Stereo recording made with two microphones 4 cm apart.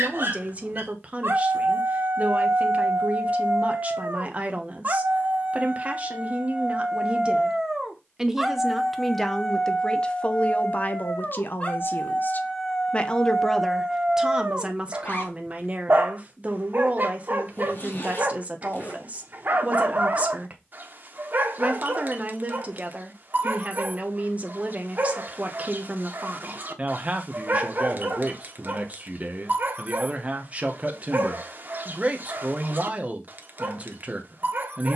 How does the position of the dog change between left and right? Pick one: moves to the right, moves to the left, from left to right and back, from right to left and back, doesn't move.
from right to left and back.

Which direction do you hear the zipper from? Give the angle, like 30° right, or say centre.
50° left.